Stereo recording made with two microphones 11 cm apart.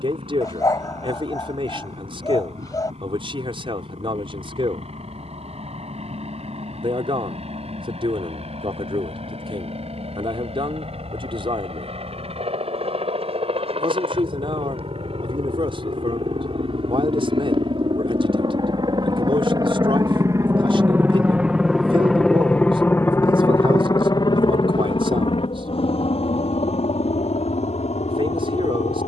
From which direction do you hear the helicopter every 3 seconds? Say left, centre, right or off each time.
right, right, right, right, right, right, right, centre, left, left.